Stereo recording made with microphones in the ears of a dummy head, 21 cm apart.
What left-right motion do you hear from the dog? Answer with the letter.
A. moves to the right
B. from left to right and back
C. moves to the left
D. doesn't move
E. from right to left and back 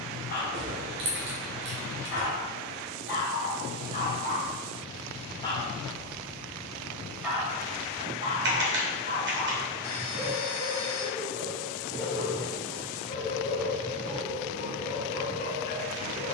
B.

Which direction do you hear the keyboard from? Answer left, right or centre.
right.